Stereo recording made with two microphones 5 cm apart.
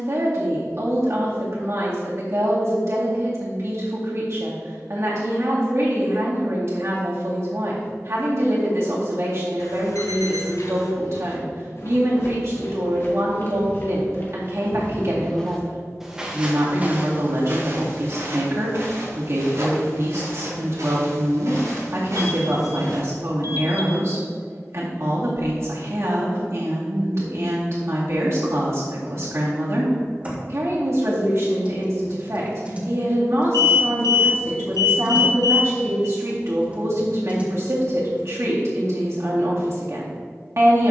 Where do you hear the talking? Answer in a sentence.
You can hear the talking on the right.